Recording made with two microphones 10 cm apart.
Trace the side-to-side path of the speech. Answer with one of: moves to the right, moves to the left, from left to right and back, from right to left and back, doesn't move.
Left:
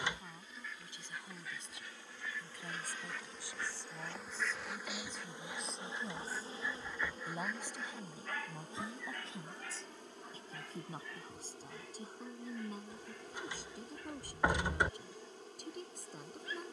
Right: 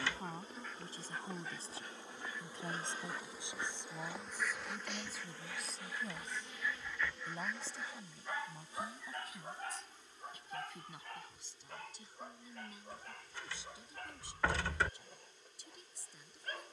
moves to the left.